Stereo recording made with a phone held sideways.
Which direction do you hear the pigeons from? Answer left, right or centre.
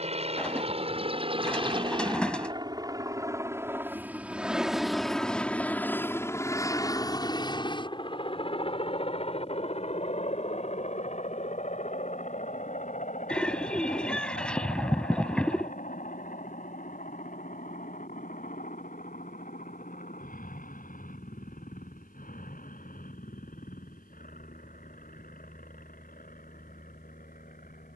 centre.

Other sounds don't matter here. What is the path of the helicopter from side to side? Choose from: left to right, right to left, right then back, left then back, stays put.
right to left.